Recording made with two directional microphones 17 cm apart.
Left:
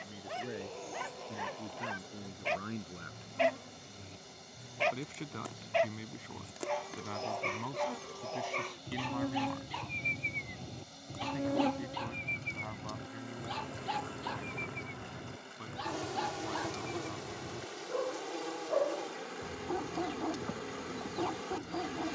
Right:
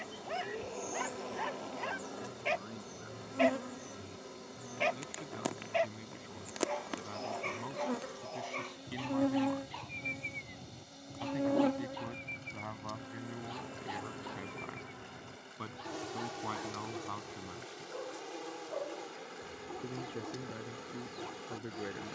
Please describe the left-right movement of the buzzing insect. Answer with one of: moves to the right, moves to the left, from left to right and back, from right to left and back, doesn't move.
moves to the left.